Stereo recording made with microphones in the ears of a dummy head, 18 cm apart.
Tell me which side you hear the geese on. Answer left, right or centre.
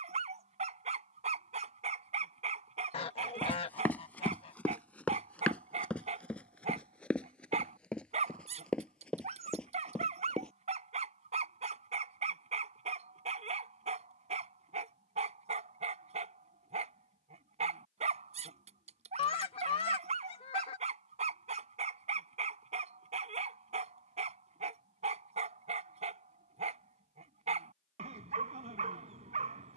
left.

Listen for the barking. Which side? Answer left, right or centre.
right.